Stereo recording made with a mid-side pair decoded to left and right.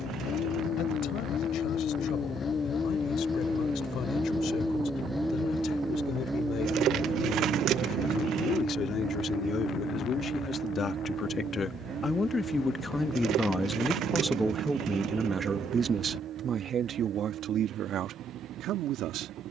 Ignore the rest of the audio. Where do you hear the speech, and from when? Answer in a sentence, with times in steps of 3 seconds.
You can hear the speech on the left from 0 s, in the centre from 12 s and on the right from 15 s.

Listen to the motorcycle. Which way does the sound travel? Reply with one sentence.
In this clip you hear the motorcycle travel towards the right.